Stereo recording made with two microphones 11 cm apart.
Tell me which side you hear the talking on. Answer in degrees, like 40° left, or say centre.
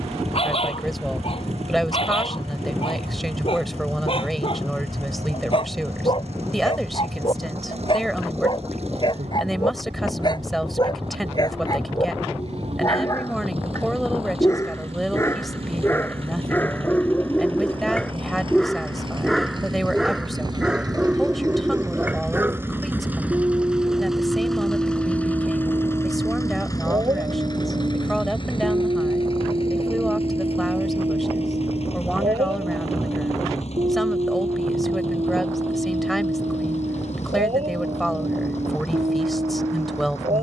centre.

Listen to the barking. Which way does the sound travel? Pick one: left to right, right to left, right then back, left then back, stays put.
left to right.